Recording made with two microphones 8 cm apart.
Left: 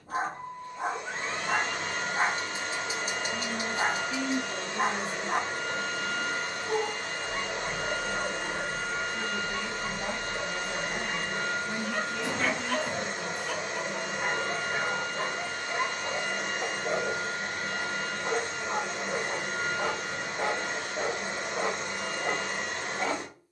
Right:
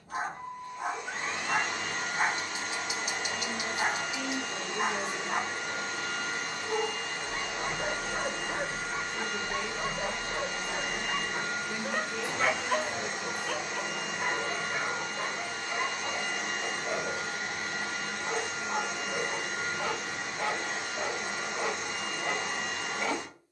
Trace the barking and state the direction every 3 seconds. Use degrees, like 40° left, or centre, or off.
30° left, 30° left, centre, 40° right, centre, 30° left, 30° left, 30° left.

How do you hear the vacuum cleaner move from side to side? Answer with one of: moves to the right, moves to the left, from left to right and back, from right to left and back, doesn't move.
doesn't move.